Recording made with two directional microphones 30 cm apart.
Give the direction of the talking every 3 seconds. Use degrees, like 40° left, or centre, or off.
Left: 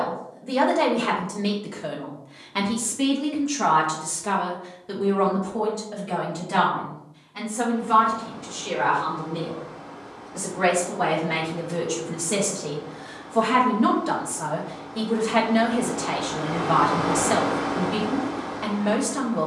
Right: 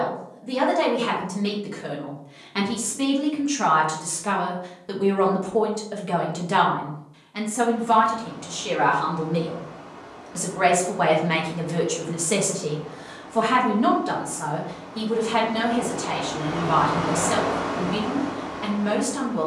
10° left, 20° right, 50° right, 50° right, 10° right, 20° left, 20° left.